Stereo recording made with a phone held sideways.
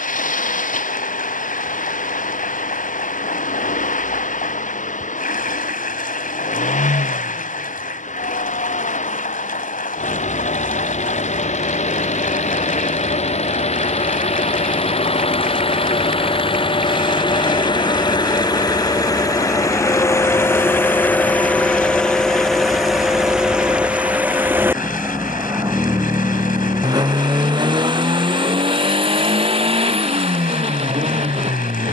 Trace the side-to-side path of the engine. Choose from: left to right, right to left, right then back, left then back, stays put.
left to right.